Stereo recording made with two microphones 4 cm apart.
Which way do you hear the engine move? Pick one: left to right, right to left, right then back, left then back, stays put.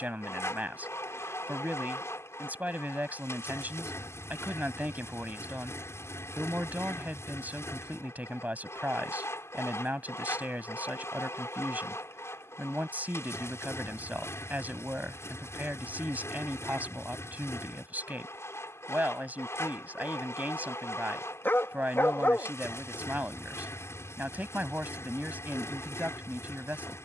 stays put.